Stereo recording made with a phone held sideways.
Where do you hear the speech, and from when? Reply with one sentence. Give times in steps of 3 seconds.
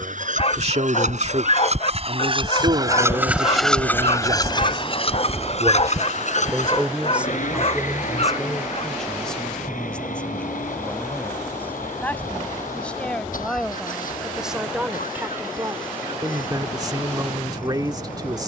You can hear the speech on the right from 0 s, in the centre from 6 s and on the right from 15 s.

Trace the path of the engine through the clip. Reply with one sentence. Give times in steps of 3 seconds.
You can hear the engine on the right from 0 s and on the left from 3 s.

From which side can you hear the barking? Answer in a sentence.
You can hear the barking on the left.